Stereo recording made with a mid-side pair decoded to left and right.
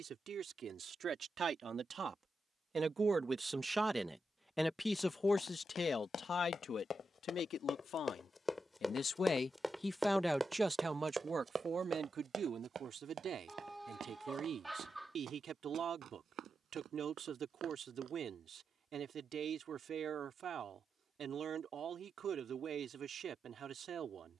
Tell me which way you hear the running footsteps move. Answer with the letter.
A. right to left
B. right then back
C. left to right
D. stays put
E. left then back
C.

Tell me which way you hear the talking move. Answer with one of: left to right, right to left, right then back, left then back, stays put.
left then back.